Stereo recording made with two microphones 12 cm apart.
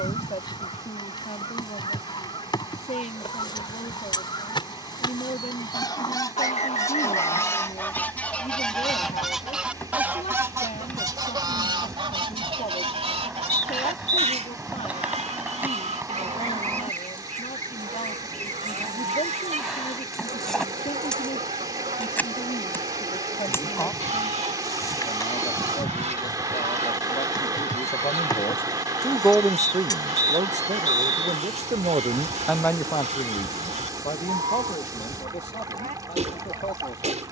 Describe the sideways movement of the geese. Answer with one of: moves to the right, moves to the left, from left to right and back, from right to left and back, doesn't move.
moves to the right.